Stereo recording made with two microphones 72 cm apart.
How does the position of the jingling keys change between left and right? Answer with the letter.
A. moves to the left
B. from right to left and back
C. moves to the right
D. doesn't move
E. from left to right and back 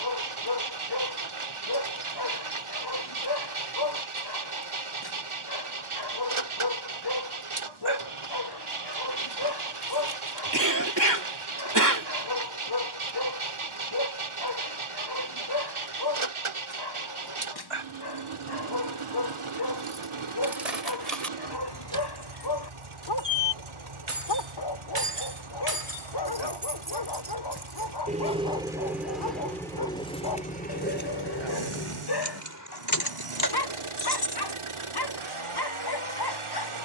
A.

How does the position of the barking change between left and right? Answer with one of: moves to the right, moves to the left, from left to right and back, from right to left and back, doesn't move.
doesn't move.